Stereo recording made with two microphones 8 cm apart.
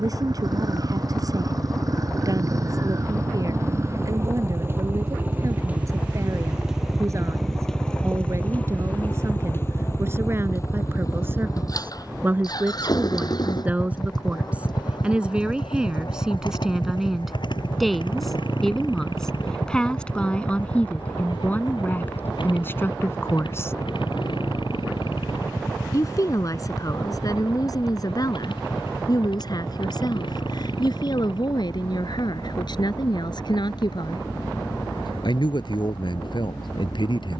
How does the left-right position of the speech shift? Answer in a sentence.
In this clip you hear the speech travel towards the left.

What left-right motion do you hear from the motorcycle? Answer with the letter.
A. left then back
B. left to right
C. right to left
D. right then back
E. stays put
C.